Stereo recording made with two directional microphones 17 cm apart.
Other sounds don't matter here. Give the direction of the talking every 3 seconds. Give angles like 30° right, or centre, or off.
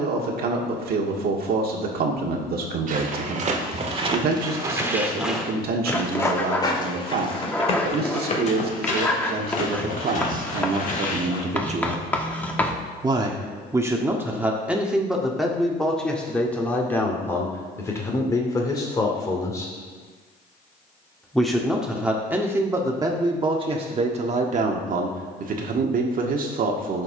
60° right, 60° right, 60° right, 50° right, 10° right, 10° left, 20° left, 20° right, 50° right.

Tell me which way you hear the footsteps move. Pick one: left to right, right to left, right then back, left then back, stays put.
right to left.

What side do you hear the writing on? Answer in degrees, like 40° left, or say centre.
10° left.